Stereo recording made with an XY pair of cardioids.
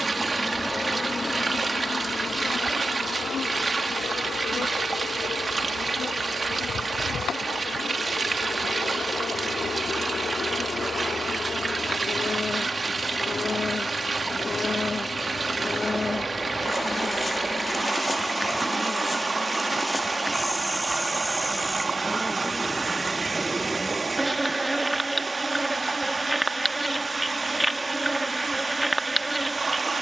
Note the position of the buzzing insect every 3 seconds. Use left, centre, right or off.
left, left, left, left, left, left, centre, centre, centre, centre.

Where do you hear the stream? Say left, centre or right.
right.